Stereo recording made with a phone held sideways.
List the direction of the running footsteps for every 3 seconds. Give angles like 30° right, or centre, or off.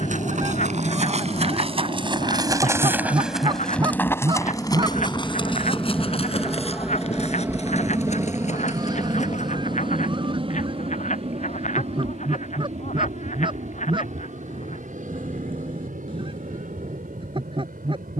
50° right, 20° left, 50° left, 60° left, off, off.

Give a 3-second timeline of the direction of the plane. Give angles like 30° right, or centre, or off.
40° left, 20° left, 10° right, 40° right, 60° right, 70° right.